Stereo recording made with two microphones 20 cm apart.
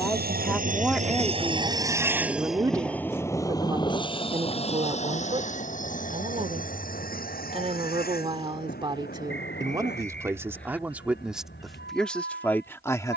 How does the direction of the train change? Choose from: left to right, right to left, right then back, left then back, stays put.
right to left.